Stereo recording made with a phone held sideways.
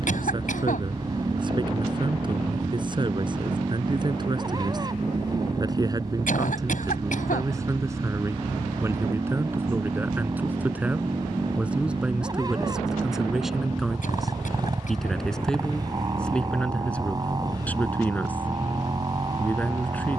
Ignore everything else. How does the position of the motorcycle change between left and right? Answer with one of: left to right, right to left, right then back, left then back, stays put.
stays put.